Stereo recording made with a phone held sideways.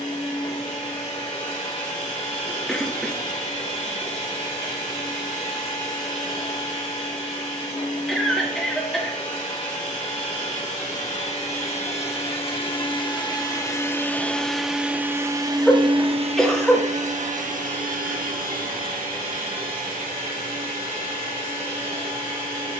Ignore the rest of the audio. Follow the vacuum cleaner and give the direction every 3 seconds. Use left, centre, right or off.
left, left, left, left, left, right, right, right.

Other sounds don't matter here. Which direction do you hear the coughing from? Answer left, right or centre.
centre.